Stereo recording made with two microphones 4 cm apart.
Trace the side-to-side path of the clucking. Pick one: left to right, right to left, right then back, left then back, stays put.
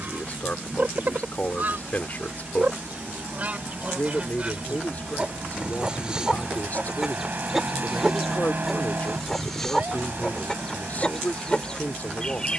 right to left.